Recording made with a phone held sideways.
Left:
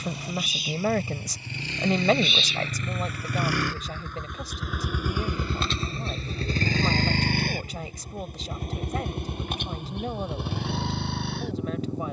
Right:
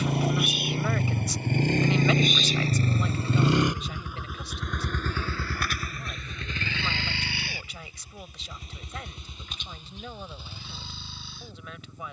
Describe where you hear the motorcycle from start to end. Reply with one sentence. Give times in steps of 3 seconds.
In this clip you hear the motorcycle on the right from 0 s, in the centre from 3 s and on the left from 6 s.